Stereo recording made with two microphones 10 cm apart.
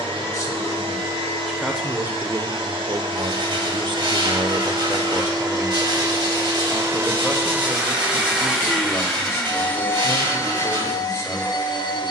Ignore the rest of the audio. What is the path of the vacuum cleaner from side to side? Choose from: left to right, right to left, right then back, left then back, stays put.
right to left.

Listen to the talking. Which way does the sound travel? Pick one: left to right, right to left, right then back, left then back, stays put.
right then back.